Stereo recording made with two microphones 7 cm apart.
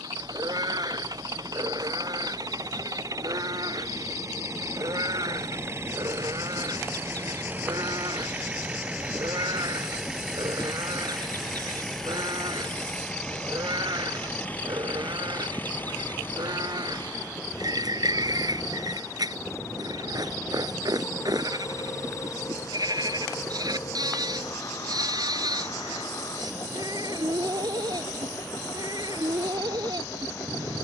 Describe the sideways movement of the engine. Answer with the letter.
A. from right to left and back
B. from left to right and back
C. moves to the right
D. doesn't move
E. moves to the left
E.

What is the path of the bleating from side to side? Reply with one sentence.
You can hear the bleating stay in one place.